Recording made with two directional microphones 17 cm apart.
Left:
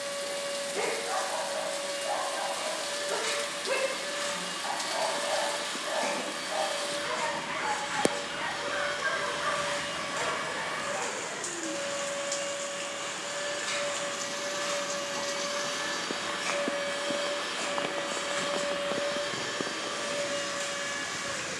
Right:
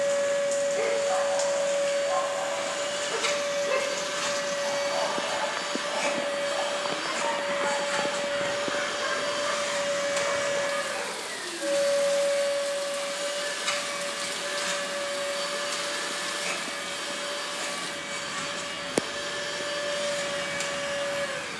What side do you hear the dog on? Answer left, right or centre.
left.